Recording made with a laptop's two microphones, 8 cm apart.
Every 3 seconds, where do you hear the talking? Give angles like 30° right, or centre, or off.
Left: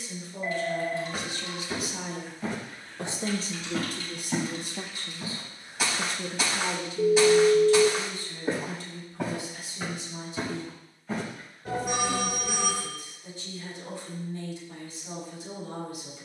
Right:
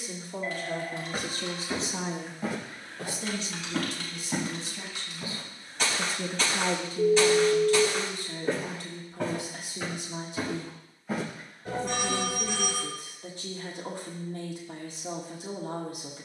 40° right, 40° left, 50° right, 60° right, 60° right, 60° right.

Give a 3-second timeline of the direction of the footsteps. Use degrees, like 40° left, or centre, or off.
10° right, centre, 10° left, centre, off, off.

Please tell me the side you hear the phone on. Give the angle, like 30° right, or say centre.
10° left.